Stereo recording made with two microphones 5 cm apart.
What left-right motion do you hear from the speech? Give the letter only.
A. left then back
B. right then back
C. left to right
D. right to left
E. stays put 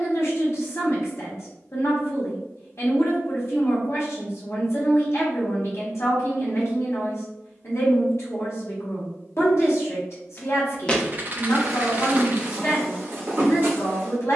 E.